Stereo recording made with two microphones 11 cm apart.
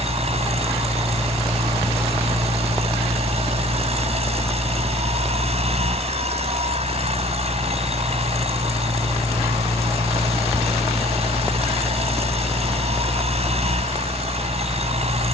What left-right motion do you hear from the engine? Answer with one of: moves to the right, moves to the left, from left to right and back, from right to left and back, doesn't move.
doesn't move.